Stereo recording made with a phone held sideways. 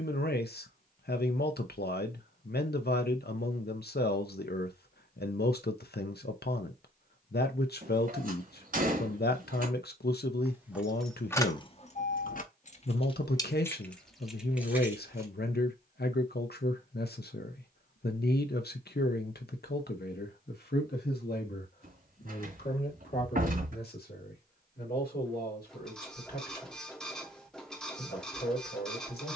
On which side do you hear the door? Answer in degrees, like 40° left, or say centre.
60° right.